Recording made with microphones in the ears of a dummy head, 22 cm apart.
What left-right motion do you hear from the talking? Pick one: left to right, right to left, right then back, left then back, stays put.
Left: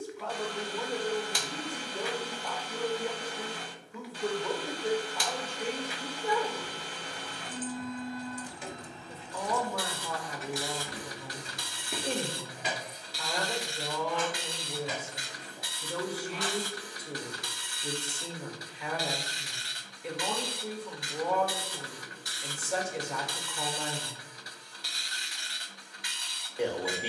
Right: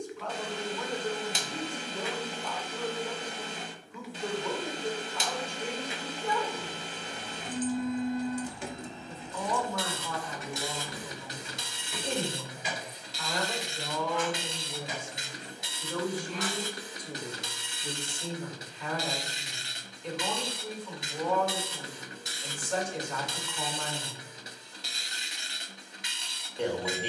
stays put.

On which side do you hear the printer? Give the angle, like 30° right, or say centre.
20° right.